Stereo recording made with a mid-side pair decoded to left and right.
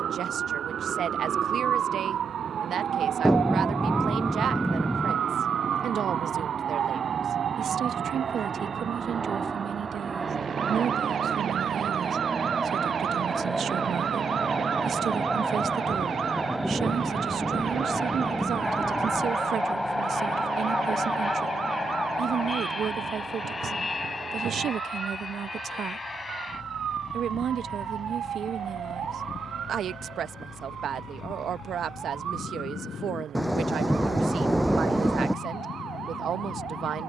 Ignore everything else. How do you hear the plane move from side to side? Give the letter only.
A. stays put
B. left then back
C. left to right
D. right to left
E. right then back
D.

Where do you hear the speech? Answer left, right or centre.
right.